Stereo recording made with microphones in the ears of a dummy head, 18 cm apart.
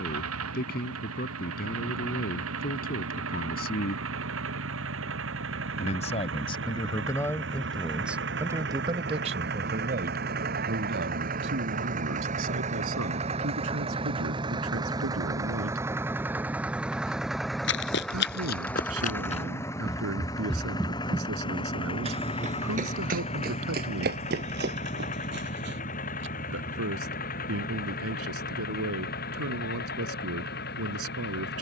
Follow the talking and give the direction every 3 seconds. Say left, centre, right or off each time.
left, left, centre, right, right, right, right, right, right, right, right.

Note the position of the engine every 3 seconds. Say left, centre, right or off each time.
right, right, right, right, right, centre, centre, left, left, left, left.